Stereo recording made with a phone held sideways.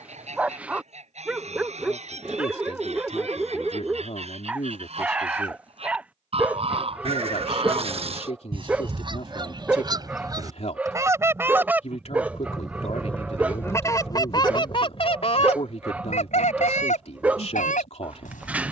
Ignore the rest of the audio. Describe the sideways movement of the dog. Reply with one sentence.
In this clip you hear the dog stay in one place.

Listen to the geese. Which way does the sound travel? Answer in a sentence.
You can hear the geese travel towards the left.